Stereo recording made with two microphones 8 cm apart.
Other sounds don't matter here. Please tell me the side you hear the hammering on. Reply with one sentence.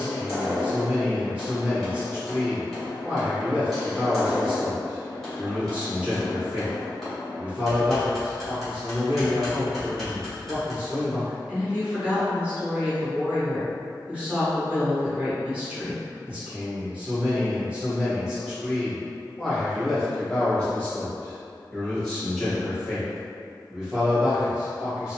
You can hear the hammering in the centre.